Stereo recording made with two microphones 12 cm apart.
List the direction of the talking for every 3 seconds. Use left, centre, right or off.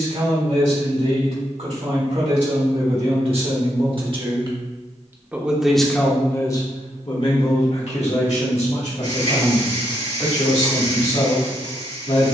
right, right, left, left.